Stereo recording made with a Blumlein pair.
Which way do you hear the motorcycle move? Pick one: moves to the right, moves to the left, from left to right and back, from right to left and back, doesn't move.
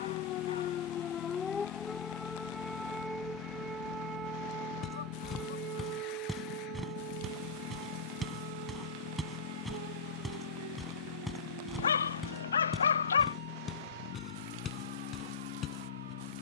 doesn't move.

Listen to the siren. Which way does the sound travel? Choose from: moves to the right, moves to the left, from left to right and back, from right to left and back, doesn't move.
moves to the right.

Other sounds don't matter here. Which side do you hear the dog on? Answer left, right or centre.
left.